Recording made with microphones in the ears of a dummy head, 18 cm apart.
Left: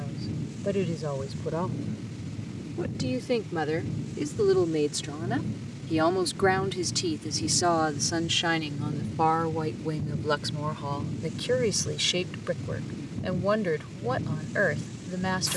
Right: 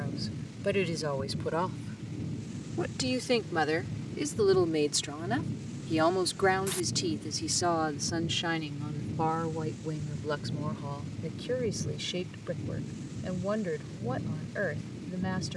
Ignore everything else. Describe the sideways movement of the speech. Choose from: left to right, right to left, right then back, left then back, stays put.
right to left.